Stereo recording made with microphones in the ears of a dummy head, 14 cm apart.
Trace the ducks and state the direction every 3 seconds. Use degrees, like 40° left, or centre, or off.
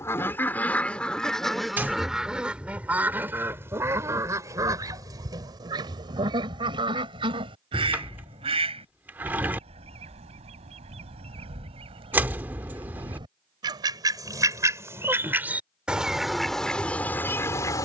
centre, 20° right, 40° right, 40° right, 30° right, centre.